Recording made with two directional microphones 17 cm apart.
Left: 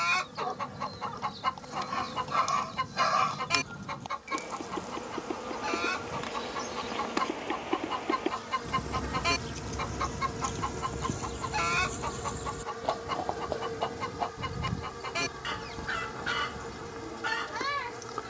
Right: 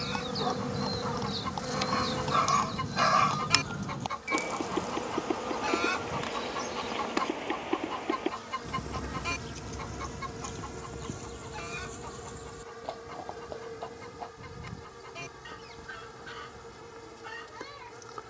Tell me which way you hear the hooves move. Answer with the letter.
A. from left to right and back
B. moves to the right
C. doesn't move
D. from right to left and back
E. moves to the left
E.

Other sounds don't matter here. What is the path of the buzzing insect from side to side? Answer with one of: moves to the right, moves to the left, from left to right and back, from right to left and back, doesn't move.
moves to the left.